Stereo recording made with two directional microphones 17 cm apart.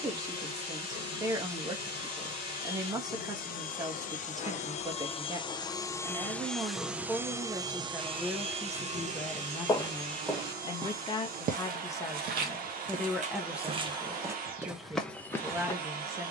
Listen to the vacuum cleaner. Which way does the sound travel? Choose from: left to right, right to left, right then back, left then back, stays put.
left to right.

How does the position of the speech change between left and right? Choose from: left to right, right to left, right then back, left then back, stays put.
left then back.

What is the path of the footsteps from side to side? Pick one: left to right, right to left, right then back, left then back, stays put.
right then back.